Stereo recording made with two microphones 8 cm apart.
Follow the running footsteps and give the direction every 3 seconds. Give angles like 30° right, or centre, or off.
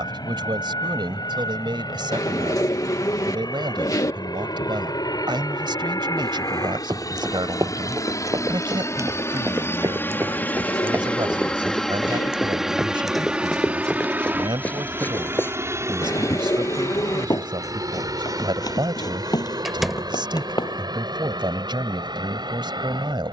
off, off, 50° right, 30° right, centre, 40° left, 60° left, off.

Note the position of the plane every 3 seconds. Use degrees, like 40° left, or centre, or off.
80° left, 70° left, 50° left, 20° left, 10° right, 40° right, 50° right, 50° right.